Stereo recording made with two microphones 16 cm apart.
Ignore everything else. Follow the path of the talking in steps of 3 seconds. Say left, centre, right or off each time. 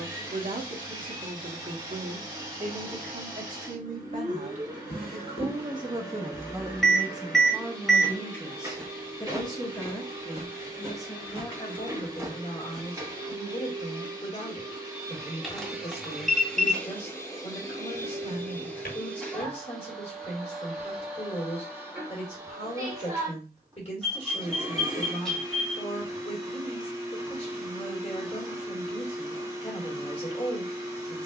right, right, centre, left, left, left, left, left, left, left, left.